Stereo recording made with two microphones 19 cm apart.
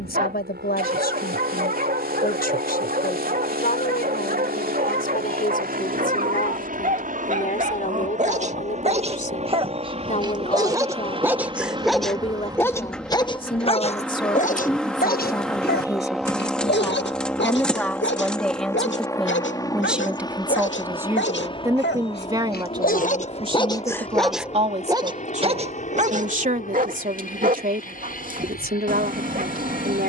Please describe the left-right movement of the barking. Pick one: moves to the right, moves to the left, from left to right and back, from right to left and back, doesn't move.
from right to left and back.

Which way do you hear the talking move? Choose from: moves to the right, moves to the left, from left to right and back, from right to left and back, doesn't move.
moves to the right.